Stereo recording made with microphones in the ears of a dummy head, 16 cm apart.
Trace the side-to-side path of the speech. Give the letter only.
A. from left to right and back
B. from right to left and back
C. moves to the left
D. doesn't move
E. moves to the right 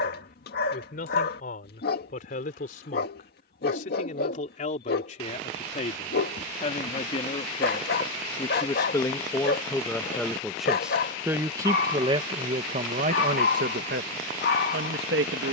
E.